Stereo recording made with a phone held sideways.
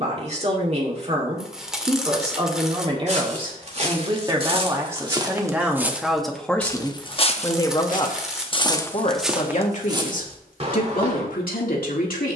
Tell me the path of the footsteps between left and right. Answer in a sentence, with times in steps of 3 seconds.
In this clip you hear the footsteps not at all from 0 s, on the right from 3 s, on the left from 6 s and on the right from 9 s.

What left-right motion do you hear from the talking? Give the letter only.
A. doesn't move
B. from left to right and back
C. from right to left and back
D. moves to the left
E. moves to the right
D.